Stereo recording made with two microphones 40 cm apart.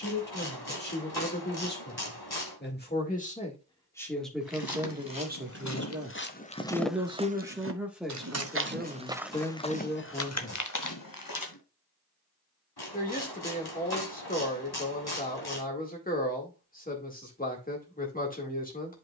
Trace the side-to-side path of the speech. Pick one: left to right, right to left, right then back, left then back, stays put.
right then back.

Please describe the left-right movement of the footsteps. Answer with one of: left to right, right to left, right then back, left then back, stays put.
right then back.